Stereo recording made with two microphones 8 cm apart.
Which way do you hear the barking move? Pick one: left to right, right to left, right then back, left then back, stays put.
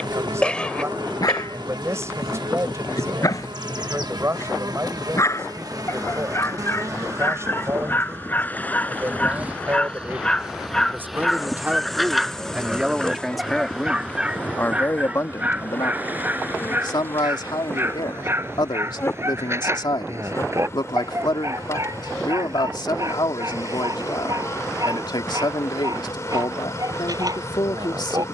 left to right.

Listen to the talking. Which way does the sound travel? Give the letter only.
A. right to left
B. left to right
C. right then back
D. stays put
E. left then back
A.